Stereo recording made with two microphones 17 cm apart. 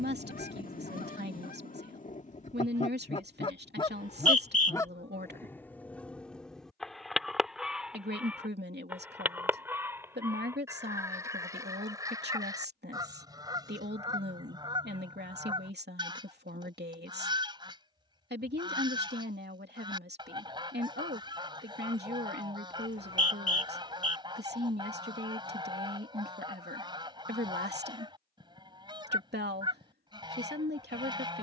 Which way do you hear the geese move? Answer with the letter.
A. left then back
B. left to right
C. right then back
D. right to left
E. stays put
B.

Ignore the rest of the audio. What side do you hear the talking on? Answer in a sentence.
In this clip you hear the talking on the right.